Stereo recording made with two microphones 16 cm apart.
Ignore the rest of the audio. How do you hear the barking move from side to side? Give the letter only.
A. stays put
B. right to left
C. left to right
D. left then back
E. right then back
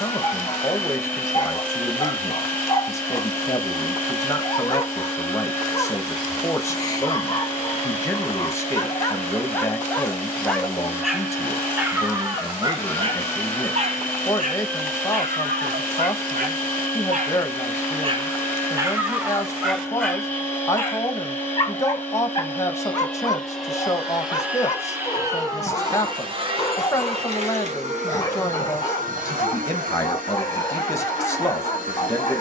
E.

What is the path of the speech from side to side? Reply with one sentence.
In this clip you hear the speech stay in one place.